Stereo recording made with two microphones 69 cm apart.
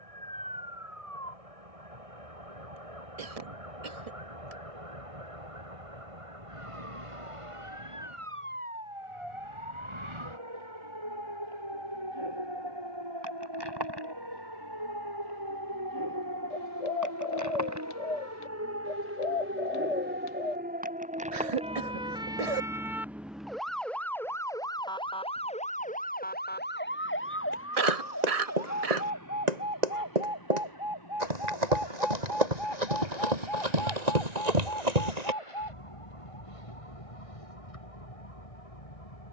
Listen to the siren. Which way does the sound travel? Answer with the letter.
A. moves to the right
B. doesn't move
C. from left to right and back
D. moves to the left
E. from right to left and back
D.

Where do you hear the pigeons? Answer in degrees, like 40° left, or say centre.
60° left.